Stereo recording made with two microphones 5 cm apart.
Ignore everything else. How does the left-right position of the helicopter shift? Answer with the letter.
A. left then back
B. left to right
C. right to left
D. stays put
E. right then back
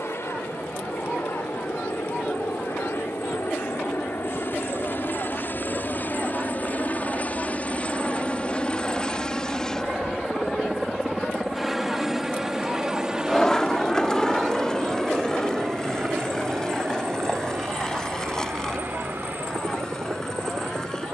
B.